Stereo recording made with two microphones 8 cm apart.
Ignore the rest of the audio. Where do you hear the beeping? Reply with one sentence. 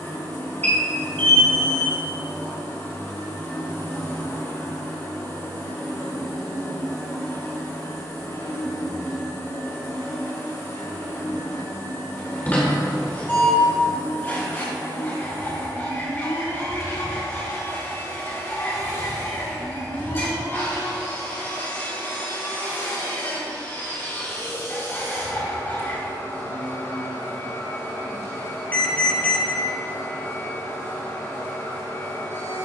In this clip you hear the beeping on the left.